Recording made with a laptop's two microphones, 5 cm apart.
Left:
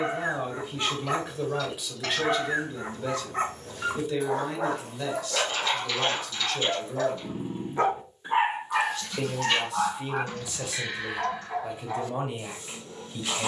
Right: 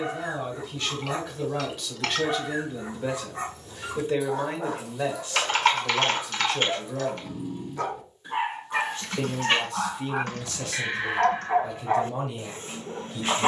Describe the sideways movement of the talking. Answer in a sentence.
You can hear the talking go right and come back.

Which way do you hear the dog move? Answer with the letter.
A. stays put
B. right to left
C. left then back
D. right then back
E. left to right
E.